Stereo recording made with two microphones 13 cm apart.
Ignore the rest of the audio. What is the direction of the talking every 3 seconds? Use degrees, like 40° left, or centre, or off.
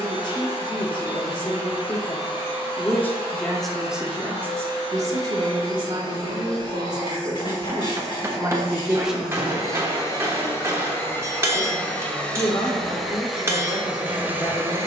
40° left, 20° right, 30° right, 10° left, 40° left.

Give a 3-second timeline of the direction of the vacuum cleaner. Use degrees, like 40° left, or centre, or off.
50° left, 40° left, 40° left, 20° left, 10° right.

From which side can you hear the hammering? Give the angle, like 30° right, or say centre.
20° right.